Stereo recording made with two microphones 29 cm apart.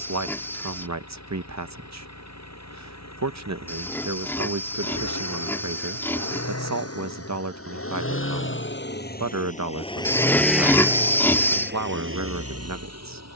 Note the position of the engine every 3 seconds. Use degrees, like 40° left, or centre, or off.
70° left, 60° left, 50° left, centre, 60° right.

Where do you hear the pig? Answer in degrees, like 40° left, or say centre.
10° left.